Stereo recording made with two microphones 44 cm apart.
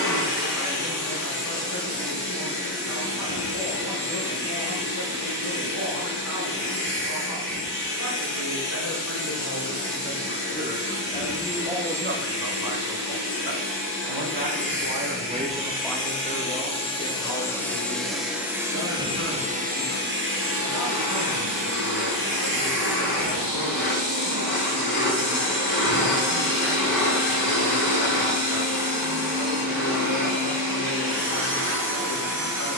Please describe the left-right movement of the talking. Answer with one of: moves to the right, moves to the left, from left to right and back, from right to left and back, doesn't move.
from left to right and back.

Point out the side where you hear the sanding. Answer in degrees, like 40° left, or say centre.
60° left.